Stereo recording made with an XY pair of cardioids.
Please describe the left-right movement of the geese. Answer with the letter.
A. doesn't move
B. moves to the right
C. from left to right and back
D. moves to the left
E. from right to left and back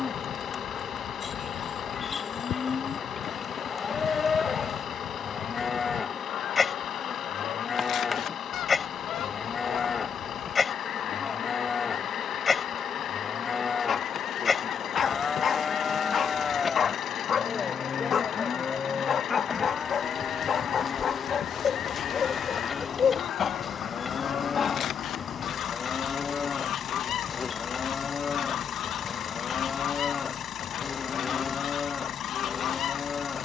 A.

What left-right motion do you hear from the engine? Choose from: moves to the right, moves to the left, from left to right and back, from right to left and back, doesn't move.
doesn't move.